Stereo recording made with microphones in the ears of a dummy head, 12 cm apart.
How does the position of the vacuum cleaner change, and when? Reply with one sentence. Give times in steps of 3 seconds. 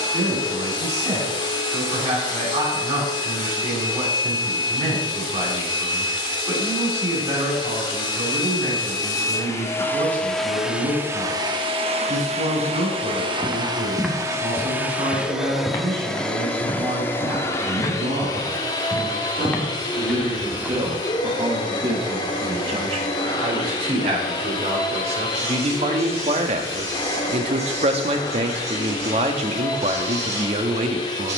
You can hear the vacuum cleaner on the left from 0 s, in the centre from 9 s, on the right from 12 s, in the centre from 15 s and on the left from 18 s.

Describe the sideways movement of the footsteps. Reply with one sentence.
In this clip you hear the footsteps move from right to left and back again.